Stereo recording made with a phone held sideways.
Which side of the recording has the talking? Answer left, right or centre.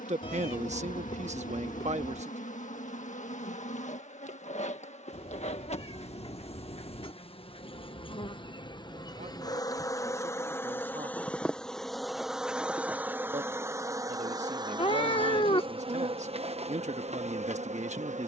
right.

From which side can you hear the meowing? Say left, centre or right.
left.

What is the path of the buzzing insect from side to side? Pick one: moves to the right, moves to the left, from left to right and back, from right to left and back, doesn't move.
moves to the right.